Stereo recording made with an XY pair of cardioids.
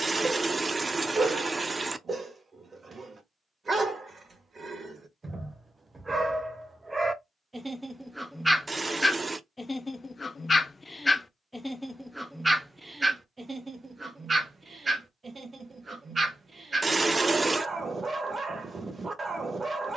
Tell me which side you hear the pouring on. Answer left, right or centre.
right.